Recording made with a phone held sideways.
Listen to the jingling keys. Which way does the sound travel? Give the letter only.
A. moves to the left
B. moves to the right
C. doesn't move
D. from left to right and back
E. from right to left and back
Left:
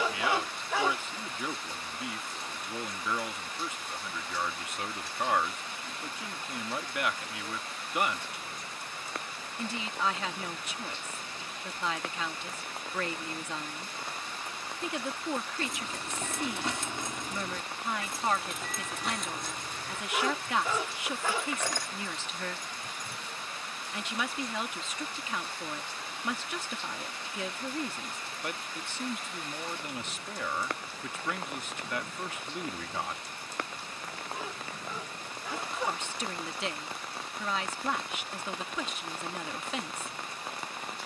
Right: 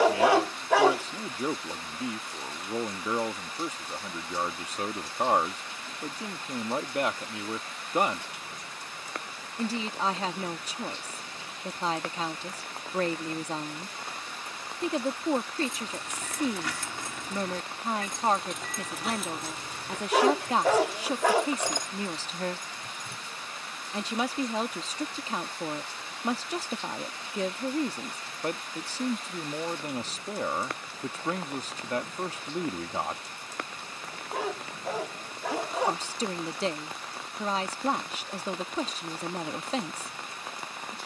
B.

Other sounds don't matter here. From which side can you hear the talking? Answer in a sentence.
In this clip you hear the talking on the right.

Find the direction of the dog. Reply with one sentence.
In this clip you hear the dog on the right.